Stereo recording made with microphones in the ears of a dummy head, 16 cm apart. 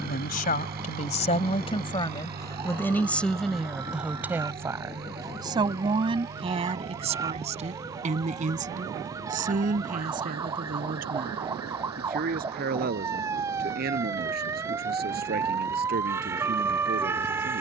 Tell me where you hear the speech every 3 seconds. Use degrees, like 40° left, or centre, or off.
30° left, 10° right, 40° right, 50° right, 60° right, 60° right.